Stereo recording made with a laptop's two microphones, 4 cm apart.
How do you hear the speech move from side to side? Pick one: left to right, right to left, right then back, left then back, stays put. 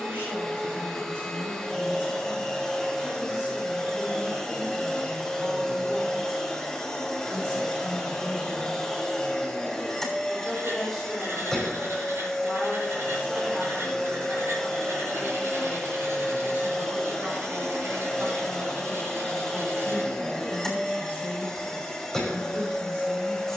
left then back.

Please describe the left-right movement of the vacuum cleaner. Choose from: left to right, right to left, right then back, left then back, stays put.
stays put.